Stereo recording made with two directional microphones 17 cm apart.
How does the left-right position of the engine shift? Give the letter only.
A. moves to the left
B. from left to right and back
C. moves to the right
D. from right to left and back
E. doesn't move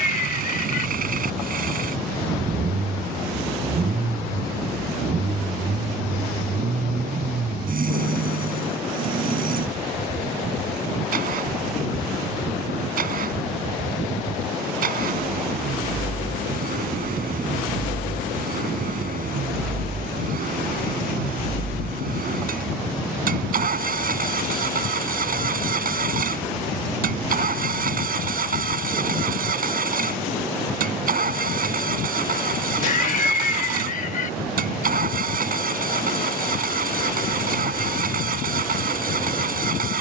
E.